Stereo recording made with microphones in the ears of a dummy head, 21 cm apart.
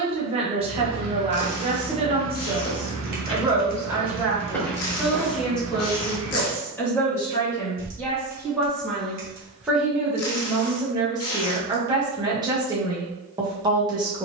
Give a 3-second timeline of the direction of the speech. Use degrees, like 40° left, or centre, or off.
30° right, centre, 10° left, 10° right, 20° right.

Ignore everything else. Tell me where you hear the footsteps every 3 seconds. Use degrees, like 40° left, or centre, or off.
centre, 10° left, 20° right, off, off.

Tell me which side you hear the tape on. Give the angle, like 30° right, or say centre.
70° left.